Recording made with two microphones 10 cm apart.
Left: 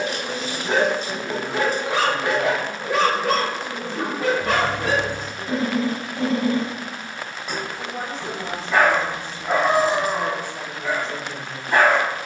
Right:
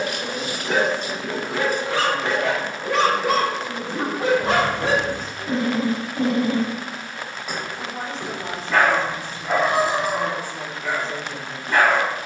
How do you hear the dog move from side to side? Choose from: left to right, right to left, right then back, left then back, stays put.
right then back.